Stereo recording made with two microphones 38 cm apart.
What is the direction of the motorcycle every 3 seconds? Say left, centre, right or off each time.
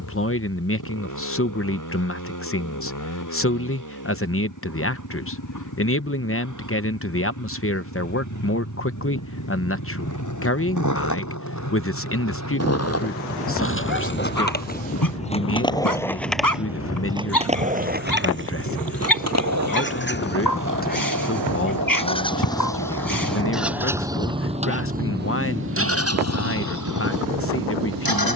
left, left, left, left, left, left, left, centre, right, right.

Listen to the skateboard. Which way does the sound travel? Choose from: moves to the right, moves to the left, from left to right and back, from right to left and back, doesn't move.
moves to the right.